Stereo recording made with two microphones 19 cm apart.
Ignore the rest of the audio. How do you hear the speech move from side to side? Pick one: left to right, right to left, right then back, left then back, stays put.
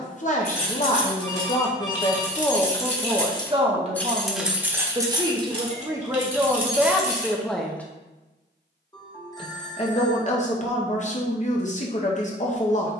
right then back.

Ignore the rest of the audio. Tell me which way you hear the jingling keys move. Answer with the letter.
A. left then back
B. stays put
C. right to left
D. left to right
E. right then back
D.